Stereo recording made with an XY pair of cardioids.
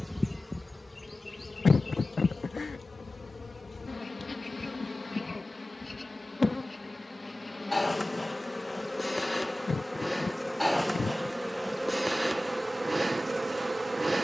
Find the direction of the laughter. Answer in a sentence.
You can hear the laughter on the left.